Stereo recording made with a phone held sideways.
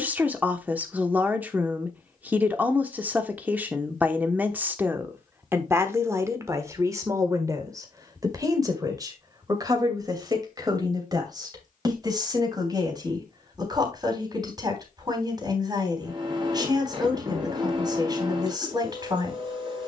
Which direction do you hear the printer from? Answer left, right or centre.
right.